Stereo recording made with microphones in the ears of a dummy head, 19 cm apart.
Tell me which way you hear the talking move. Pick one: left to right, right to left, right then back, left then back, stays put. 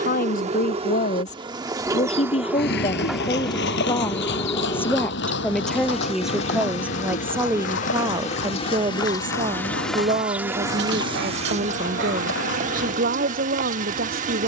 left to right.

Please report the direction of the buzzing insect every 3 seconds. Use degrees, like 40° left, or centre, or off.
20° right, 10° left, 30° left, 10° right, 40° right.